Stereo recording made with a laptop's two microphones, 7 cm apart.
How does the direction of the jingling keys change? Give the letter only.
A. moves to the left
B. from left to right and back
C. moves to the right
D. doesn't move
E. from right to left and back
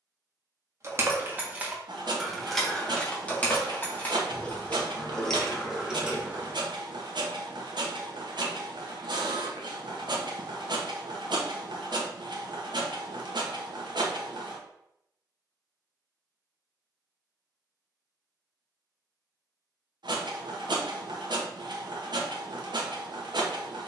E.